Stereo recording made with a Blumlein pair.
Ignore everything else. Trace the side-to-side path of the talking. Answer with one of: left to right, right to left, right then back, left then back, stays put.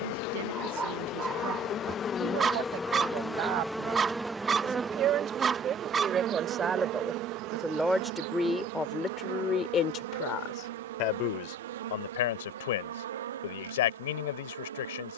right to left.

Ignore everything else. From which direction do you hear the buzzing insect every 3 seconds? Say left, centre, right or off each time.
left, centre, right, right, right.